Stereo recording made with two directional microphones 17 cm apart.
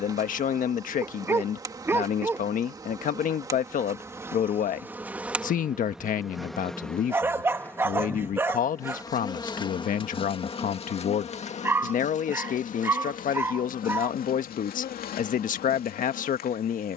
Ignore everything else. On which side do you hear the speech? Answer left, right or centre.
left.